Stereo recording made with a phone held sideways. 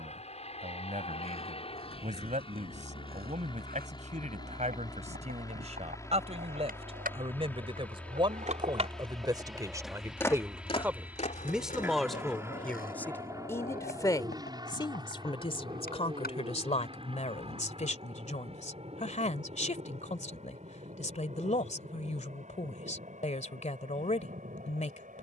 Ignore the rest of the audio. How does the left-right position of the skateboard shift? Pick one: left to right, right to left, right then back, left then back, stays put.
right to left.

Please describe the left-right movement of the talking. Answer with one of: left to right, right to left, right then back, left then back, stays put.
right to left.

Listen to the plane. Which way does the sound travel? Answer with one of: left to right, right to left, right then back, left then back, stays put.
left to right.